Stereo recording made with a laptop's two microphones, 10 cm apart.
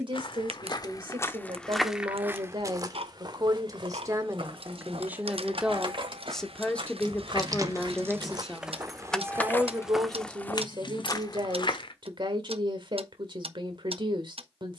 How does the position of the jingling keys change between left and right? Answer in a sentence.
In this clip you hear the jingling keys travel towards the left.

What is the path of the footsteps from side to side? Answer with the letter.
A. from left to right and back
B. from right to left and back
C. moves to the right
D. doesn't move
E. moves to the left
A.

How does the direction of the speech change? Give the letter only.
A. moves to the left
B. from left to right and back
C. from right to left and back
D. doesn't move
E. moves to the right
C.